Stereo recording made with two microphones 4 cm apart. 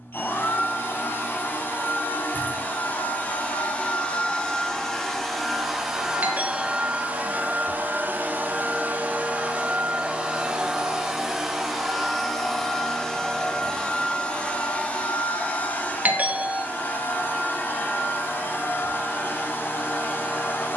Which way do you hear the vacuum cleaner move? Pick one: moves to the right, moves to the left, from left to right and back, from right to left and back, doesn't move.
from left to right and back.